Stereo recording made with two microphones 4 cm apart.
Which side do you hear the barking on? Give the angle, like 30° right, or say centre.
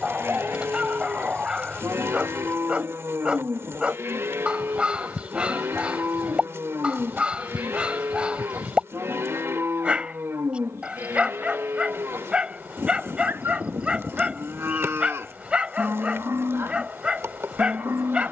20° right.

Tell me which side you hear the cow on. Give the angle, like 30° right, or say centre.
70° right.